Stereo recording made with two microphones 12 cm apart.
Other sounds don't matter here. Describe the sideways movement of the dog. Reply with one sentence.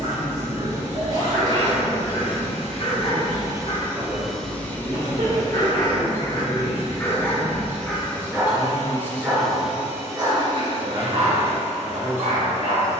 In this clip you hear the dog move to the right.